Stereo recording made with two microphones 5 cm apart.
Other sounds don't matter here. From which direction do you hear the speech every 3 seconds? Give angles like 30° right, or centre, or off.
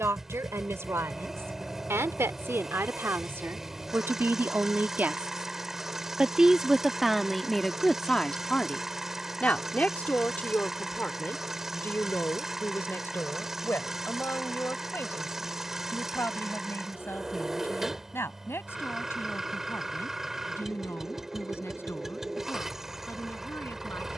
70° right, 50° right, centre, 40° left, 50° left, 60° left, 60° left, 60° left.